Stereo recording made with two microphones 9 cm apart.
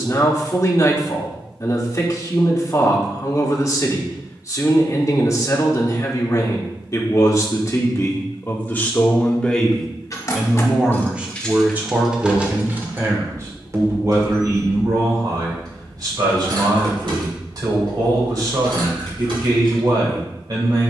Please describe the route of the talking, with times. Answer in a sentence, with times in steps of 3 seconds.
In this clip you hear the talking on the left from 0 s, in the centre from 9 s and on the right from 12 s.